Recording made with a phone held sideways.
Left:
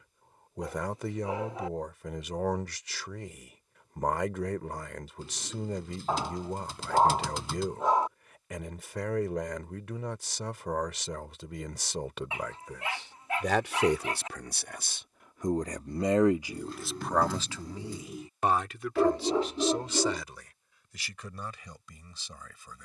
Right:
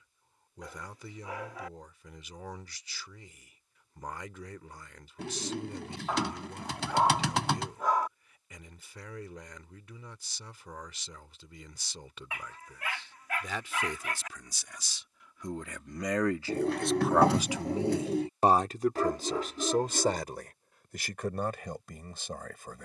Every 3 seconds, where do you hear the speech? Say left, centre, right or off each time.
left, left, left, left, left, centre, right, right.